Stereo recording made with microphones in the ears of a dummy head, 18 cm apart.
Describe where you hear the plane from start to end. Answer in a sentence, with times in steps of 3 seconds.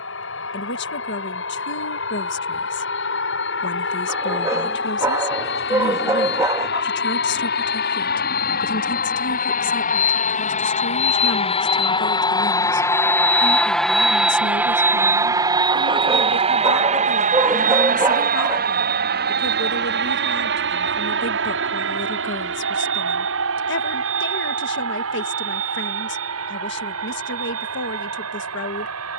In this clip you hear the plane on the left from 0 s, in the centre from 12 s and on the right from 15 s.